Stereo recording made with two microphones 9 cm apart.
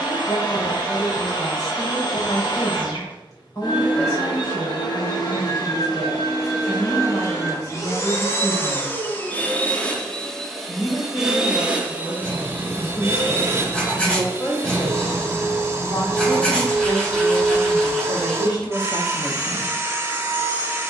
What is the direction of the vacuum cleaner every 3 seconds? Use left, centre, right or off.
left, left, left, centre, right, right, right.